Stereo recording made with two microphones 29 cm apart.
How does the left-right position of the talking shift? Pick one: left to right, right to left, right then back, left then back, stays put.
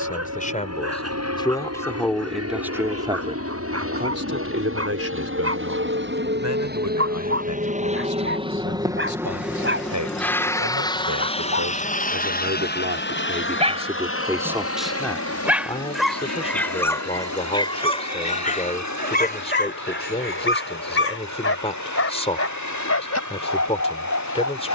right then back.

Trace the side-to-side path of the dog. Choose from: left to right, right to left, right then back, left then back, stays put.
right to left.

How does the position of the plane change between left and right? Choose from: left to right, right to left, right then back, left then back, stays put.
right to left.